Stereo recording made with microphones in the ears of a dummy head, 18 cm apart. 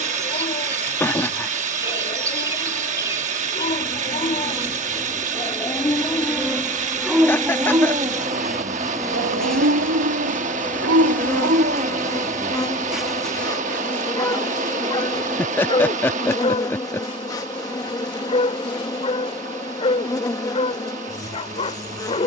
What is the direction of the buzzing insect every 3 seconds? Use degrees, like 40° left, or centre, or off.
20° right, 20° right, 10° right, 10° left, 20° left, 20° left, 20° left, 20° left.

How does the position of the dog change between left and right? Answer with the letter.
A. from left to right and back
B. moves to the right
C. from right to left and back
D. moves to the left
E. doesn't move
A.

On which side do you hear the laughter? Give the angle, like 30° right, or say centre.
10° left.